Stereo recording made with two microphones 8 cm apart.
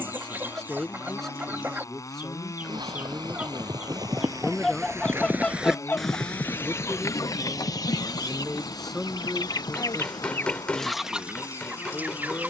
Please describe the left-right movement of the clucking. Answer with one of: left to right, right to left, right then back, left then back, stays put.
left then back.